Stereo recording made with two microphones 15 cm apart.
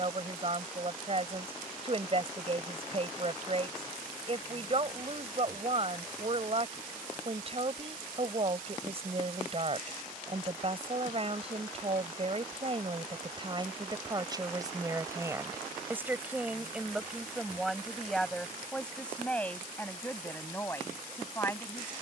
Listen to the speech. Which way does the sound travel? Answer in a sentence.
In this clip you hear the speech move to the left.